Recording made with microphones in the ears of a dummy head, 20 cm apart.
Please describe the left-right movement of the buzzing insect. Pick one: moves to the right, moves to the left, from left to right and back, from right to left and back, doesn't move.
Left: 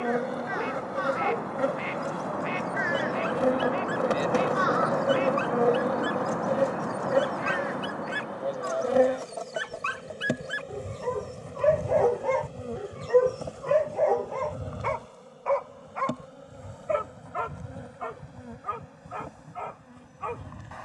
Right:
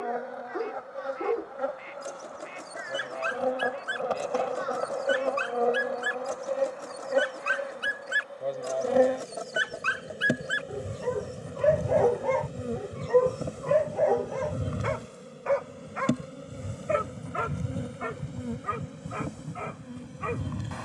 moves to the right.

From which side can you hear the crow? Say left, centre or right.
left.